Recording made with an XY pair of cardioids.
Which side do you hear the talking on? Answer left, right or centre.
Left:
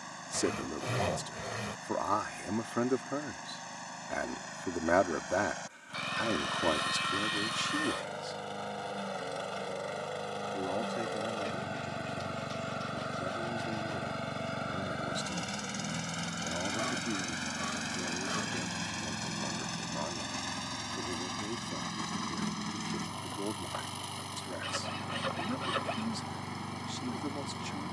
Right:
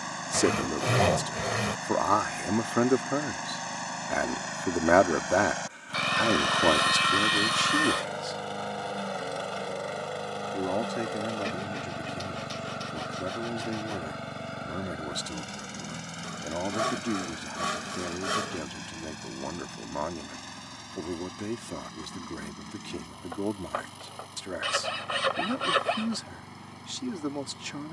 right.